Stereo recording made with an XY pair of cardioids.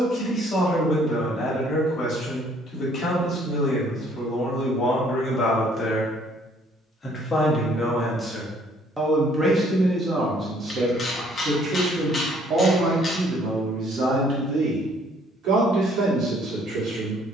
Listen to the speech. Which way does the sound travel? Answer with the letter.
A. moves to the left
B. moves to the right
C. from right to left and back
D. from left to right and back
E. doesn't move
B.